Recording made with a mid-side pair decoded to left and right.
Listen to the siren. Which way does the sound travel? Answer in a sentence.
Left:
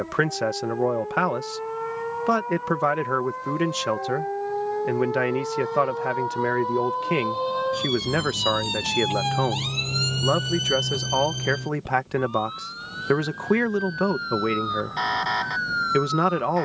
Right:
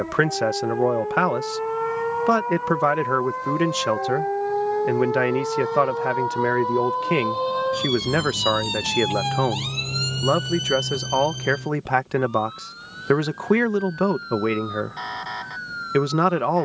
In this clip you hear the siren travel towards the left.